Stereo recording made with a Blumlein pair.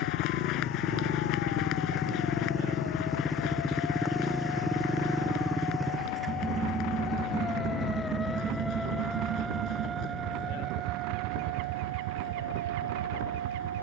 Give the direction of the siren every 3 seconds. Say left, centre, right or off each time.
left, left, left, right, right.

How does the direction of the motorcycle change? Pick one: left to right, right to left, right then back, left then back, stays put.
left to right.